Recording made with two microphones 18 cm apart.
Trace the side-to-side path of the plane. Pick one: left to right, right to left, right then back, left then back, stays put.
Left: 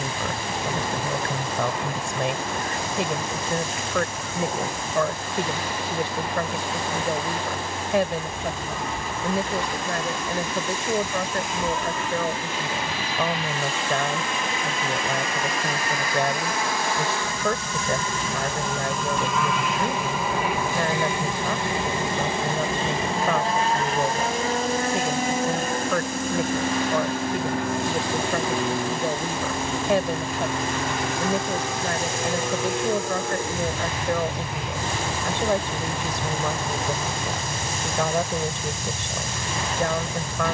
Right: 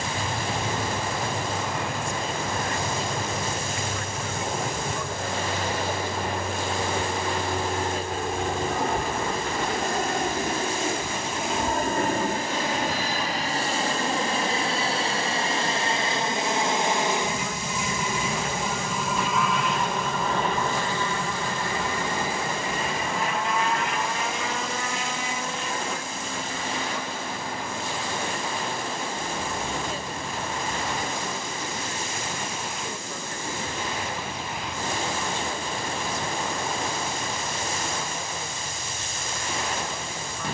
right to left.